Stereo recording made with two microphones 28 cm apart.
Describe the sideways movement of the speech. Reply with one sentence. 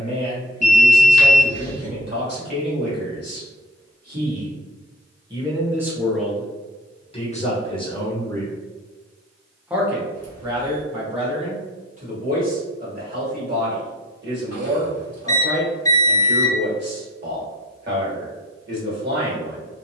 You can hear the speech go left and come back.